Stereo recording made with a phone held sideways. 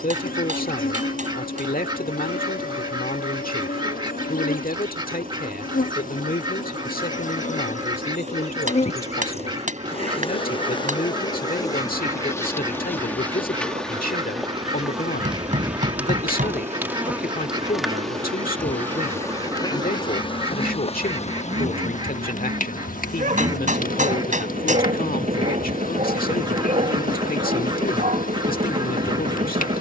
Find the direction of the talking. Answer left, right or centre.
left.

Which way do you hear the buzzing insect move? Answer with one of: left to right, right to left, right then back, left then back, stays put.
right then back.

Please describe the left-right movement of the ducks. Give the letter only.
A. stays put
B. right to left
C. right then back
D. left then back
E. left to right
A.